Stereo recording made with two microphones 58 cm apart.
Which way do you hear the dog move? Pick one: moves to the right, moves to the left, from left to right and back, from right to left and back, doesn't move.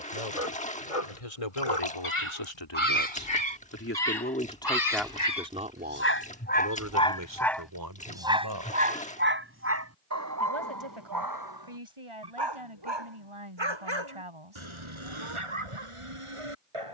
moves to the right.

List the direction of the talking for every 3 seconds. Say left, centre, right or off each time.
left, centre, right, right, right, off.